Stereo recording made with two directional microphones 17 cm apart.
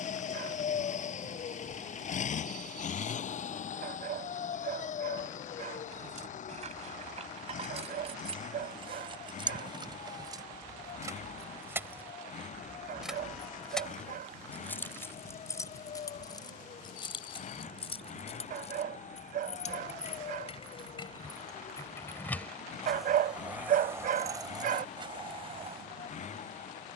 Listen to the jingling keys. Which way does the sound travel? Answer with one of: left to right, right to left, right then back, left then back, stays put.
left then back.